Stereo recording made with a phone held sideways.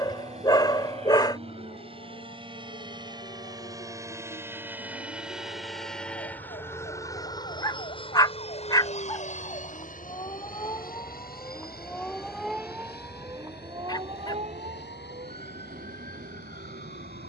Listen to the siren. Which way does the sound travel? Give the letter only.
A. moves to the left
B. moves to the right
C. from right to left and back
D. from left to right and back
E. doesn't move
B.